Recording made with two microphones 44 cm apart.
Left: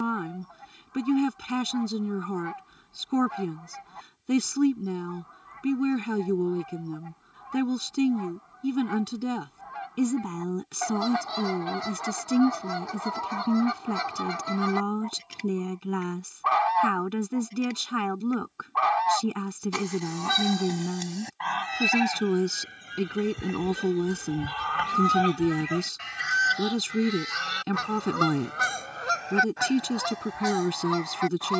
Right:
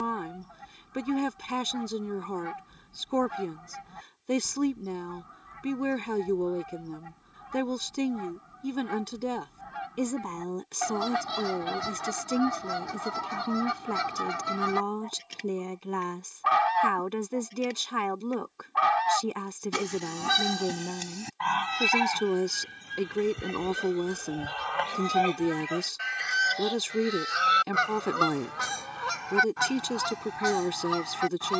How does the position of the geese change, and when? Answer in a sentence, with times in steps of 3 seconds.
You can hear the geese on the right from 0 s, in the centre from 21 s, on the left from 24 s, in the centre from 27 s and on the right from 30 s.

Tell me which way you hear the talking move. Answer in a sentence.
In this clip you hear the talking stay put.